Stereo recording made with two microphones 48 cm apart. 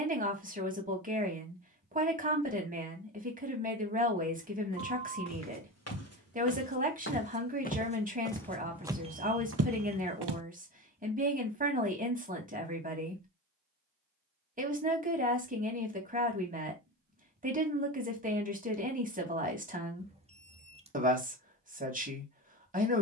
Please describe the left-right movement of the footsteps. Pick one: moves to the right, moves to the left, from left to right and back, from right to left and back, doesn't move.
moves to the right.